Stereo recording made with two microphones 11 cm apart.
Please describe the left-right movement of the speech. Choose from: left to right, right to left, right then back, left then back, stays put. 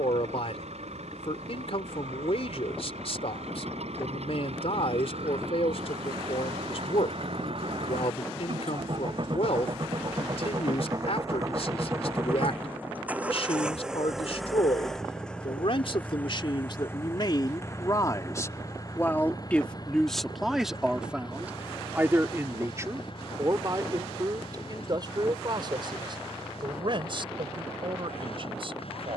left to right.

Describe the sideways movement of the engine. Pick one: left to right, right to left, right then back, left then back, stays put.
right to left.